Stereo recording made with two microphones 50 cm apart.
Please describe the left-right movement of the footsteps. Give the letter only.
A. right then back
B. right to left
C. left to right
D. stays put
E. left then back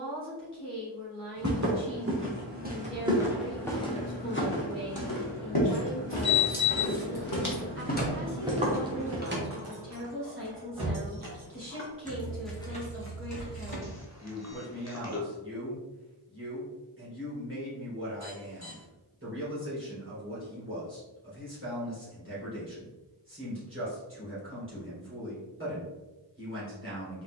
E.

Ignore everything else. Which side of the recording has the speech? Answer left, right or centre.
right.